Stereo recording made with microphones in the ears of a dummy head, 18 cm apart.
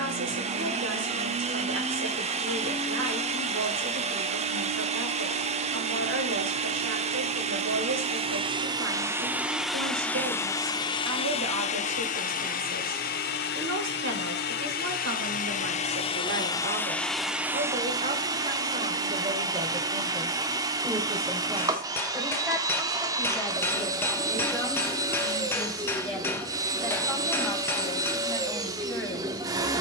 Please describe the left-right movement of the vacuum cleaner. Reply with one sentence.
In this clip you hear the vacuum cleaner go left and come back.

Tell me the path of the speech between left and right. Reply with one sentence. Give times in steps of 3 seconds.
In this clip you hear the speech on the right from 0 s and in the centre from 21 s.